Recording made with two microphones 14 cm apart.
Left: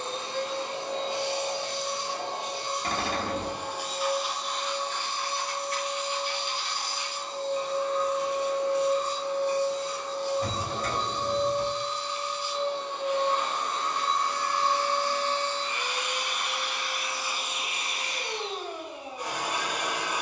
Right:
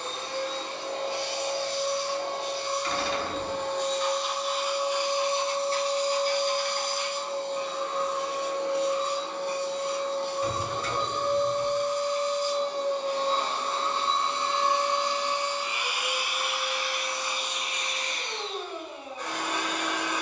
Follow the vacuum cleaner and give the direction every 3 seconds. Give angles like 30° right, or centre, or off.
20° left, centre, 60° right, 60° right, 30° right, centre, 10° left.